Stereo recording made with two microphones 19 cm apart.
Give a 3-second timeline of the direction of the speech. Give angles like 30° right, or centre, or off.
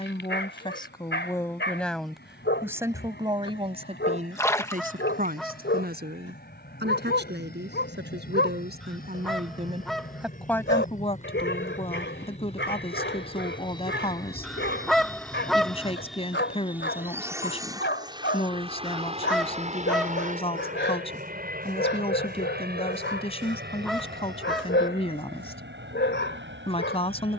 10° left, 40° right, 60° right, centre, 30° left, 30° left, 30° left, 30° left, 30° left.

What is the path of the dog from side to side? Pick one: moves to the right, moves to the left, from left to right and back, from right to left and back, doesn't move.
doesn't move.